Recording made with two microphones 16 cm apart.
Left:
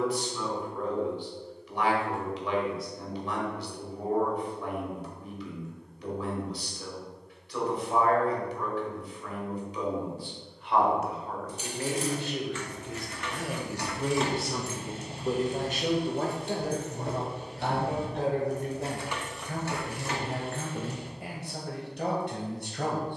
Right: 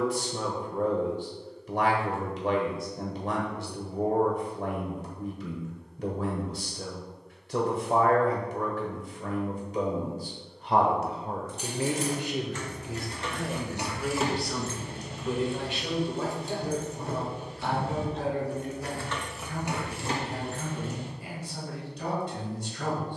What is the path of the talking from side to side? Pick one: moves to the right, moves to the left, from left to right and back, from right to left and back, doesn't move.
moves to the left.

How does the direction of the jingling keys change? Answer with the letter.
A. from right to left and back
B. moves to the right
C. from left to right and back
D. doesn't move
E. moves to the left
A.